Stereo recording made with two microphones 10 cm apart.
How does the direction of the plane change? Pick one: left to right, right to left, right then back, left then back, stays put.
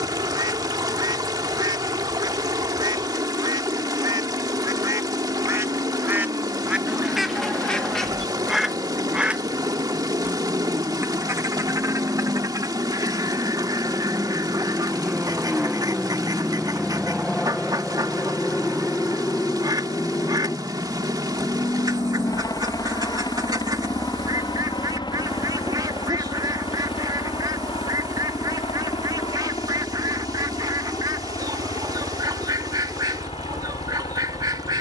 right to left.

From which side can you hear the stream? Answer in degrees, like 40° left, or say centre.
40° right.